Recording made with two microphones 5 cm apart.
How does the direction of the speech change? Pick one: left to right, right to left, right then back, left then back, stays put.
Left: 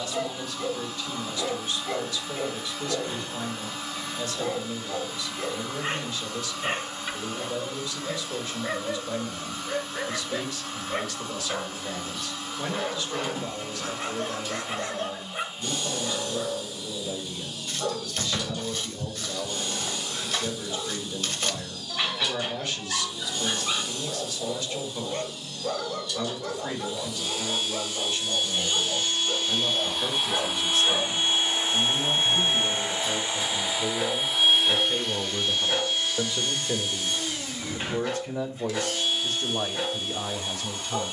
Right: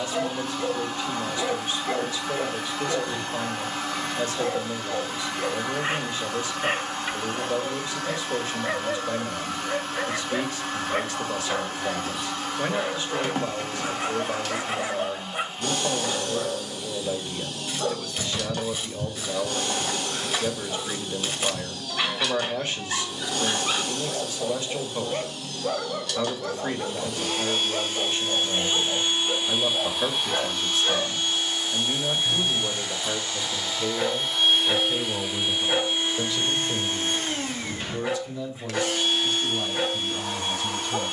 right to left.